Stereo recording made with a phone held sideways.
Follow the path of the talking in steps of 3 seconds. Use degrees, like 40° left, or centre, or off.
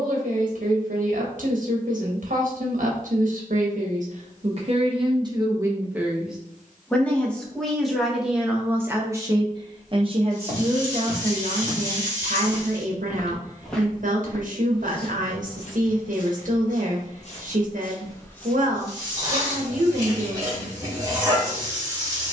70° right, 40° right, centre, 50° right, 60° right, 60° right, 60° right, off.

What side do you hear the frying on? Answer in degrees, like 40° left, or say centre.
20° right.